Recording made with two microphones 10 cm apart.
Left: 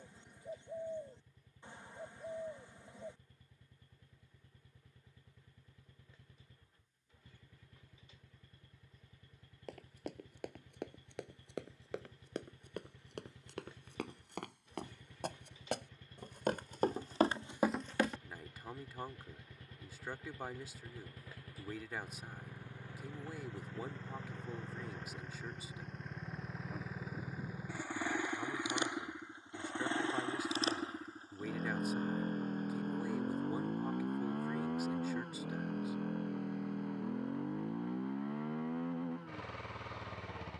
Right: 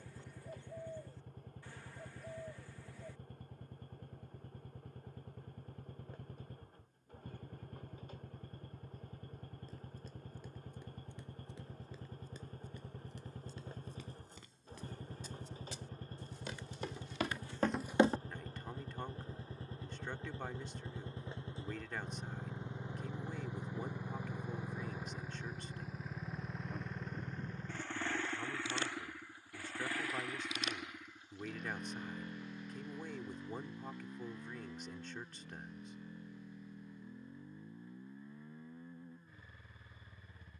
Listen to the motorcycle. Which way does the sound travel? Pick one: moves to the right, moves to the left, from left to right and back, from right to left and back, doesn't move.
moves to the left.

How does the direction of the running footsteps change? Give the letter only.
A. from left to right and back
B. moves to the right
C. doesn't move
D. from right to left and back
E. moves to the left
B.